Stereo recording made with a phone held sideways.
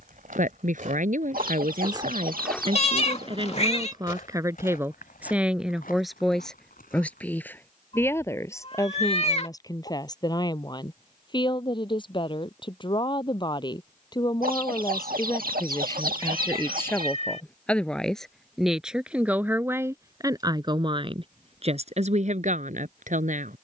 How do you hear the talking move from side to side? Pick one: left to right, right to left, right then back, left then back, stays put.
left then back.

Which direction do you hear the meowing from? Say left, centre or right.
left.